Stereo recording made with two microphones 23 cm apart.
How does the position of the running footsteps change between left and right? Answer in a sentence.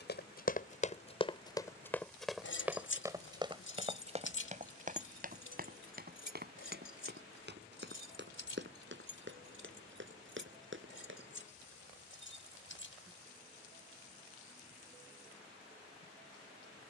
In this clip you hear the running footsteps go from the left side to the right.